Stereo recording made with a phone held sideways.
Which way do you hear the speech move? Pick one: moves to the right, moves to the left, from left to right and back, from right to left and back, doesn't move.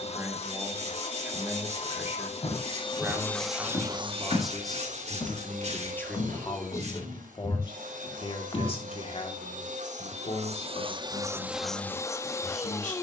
moves to the left.